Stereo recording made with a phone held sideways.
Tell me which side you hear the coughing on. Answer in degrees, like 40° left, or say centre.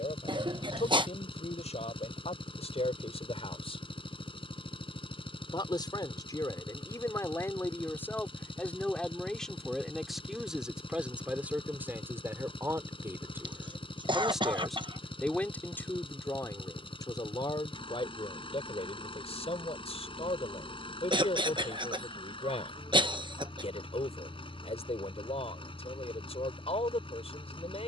40° right.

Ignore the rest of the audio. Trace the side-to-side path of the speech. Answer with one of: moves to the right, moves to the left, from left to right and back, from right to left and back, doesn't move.
from left to right and back.